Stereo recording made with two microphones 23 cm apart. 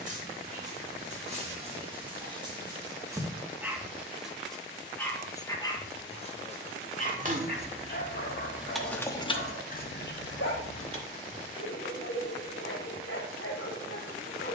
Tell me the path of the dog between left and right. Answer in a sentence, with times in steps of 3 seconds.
In this clip you hear the dog on the right from 0 s, in the centre from 3 s and on the left from 6 s.